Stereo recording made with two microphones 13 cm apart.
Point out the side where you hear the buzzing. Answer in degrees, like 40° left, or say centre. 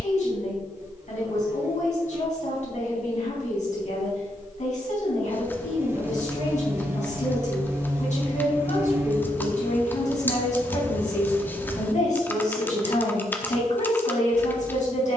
20° right.